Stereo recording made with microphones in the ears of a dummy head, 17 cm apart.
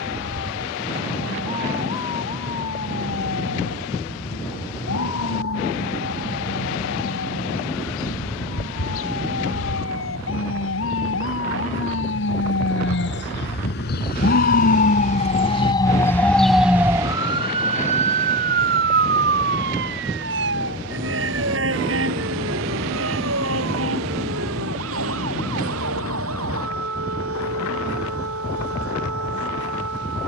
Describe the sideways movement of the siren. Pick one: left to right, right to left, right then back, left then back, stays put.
left to right.